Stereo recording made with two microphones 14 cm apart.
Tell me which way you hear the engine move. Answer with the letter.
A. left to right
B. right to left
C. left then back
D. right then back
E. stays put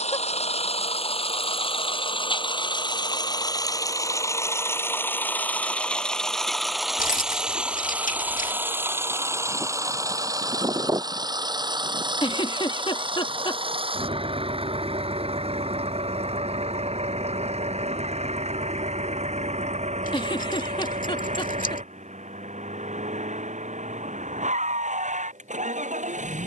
A.